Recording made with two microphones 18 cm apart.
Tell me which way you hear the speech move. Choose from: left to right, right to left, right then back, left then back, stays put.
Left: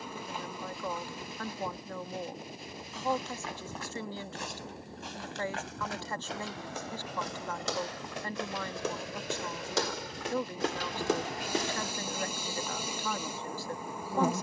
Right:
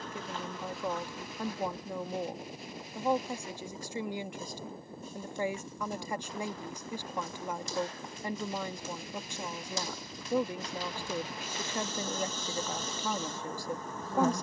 stays put.